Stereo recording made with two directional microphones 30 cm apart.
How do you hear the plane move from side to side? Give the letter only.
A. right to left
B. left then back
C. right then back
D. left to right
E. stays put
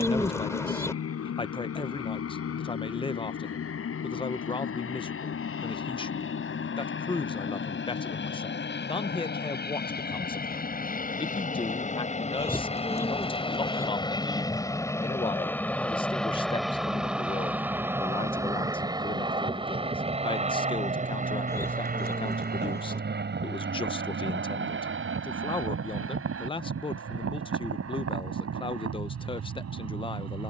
D.